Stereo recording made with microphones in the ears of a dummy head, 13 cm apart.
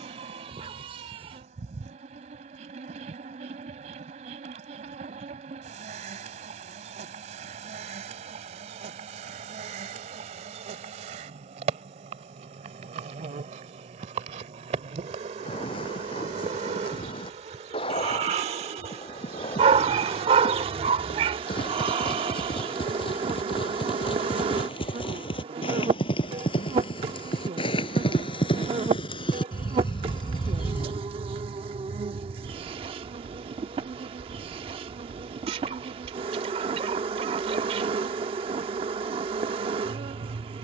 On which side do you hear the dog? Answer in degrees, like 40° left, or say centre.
40° right.